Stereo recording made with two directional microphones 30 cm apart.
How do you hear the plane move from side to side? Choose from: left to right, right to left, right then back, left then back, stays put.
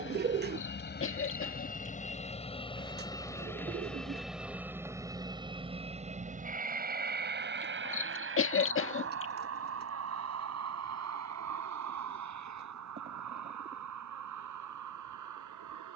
left to right.